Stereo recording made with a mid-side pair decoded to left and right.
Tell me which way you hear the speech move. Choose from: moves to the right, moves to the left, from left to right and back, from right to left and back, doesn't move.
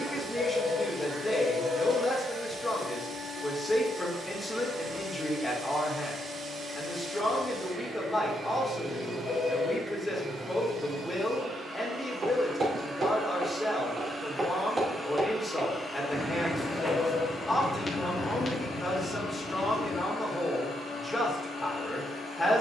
doesn't move.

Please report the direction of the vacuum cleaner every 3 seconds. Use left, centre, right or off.
right, right, right, right, right, left, left, left.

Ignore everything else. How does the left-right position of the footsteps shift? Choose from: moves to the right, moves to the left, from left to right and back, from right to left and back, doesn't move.
moves to the left.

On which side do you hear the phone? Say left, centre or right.
left.